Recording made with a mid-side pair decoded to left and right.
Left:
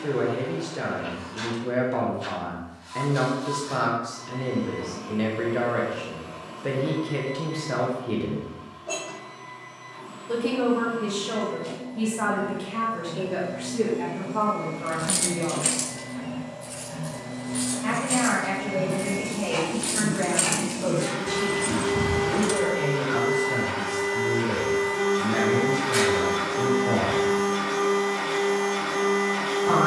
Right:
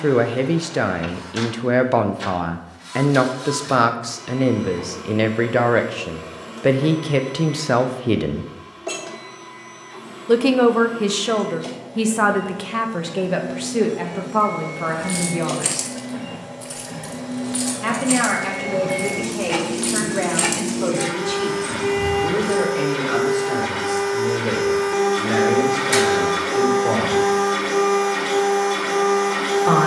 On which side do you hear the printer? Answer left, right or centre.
right.